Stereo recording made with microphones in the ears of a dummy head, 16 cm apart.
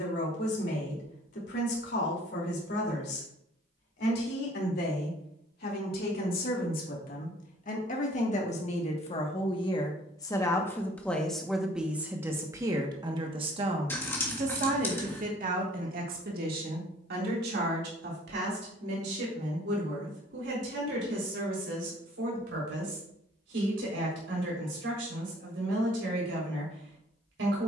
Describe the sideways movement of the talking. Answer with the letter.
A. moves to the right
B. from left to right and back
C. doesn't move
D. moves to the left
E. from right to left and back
A.